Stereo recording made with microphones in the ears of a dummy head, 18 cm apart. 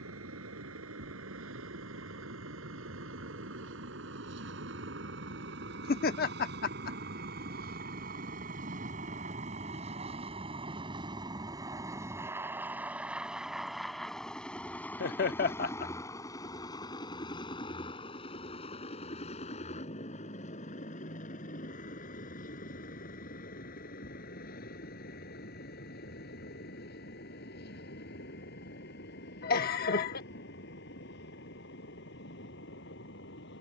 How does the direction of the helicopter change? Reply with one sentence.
You can hear the helicopter move from right to left.